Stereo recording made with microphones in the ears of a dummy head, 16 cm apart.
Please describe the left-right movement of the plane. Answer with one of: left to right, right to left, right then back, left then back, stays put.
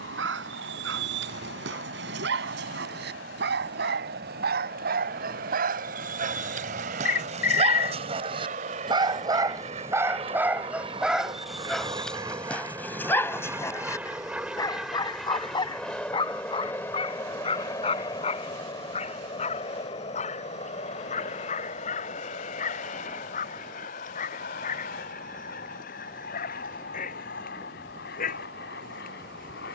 right to left.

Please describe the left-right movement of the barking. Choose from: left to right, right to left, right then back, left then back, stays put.
right to left.